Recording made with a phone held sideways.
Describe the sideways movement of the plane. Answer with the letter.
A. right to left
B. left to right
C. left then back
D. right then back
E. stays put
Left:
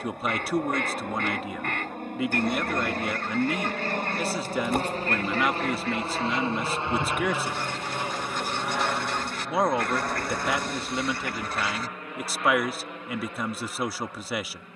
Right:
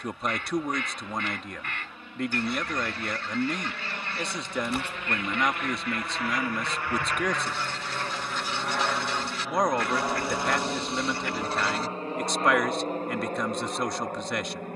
B.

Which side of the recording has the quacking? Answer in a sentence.
You can hear the quacking on the left.